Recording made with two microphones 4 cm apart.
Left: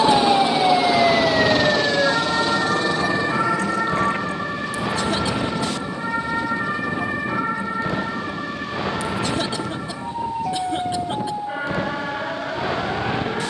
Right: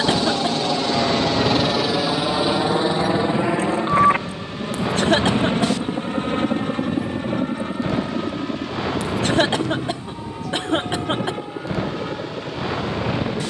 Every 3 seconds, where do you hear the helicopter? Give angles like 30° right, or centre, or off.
centre, 30° right, 50° right, 50° right, 60° right.